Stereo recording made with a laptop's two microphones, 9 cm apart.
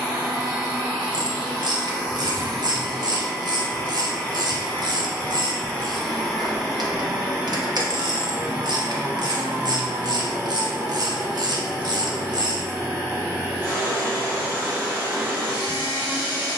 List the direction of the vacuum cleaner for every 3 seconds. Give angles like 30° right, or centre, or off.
10° right, 20° left, 10° right, 20° right, 20° right, 20° right.